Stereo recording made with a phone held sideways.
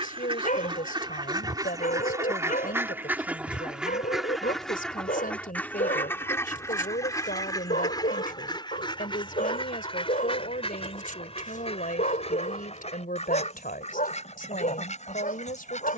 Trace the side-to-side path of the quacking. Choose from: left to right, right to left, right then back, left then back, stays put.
right to left.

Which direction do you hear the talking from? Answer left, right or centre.
left.